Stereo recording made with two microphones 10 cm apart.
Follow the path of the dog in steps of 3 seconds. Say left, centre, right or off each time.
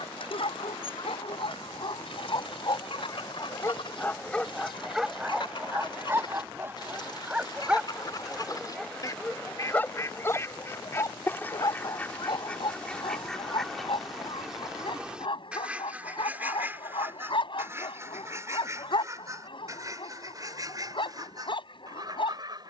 left, centre, centre, left, left, left, left, left.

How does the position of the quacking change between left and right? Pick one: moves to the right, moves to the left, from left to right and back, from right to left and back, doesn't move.
moves to the right.